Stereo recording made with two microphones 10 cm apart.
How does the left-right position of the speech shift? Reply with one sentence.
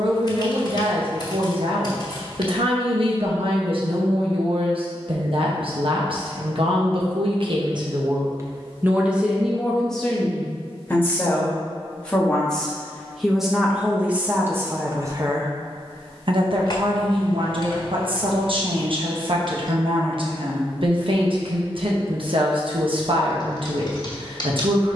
You can hear the speech go left and come back.